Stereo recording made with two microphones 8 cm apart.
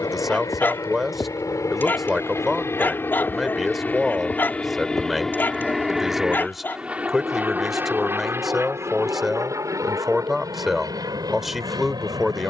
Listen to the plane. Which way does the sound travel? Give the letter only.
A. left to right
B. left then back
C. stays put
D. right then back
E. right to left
A.